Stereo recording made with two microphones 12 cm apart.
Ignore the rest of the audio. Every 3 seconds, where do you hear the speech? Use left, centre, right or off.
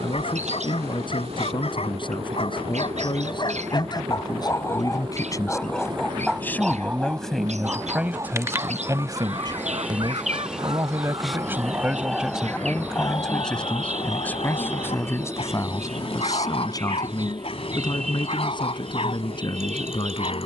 left, left, centre, right, centre, left, left.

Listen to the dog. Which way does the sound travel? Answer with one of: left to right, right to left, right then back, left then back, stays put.
right then back.